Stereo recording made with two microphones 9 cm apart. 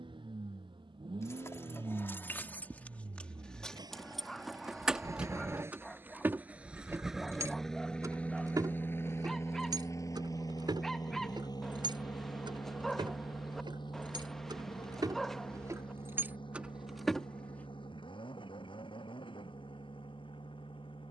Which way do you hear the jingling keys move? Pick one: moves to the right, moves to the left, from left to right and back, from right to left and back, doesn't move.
from left to right and back.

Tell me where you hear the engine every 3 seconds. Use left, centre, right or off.
right, right, centre, left, left, left, left.